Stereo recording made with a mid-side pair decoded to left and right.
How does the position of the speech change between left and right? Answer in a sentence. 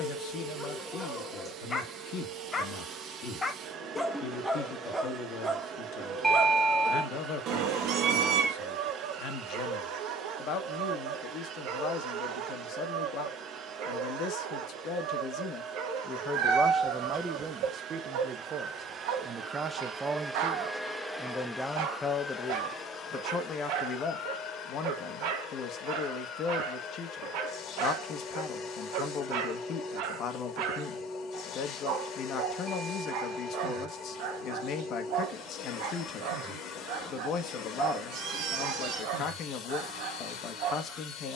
You can hear the speech move from left to right and back again.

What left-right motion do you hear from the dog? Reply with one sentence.
In this clip you hear the dog move to the right.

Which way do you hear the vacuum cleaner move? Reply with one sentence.
In this clip you hear the vacuum cleaner move to the left.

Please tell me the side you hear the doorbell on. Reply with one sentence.
You can hear the doorbell in the centre.